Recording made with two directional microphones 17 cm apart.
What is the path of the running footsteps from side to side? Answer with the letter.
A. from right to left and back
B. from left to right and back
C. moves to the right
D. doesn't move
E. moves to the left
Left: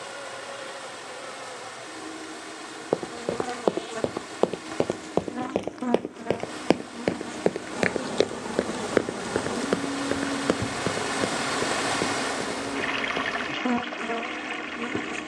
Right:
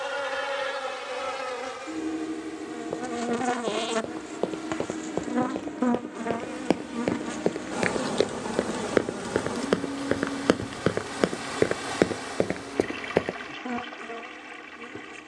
C.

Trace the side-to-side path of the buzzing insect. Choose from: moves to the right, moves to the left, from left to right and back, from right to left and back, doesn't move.
moves to the left.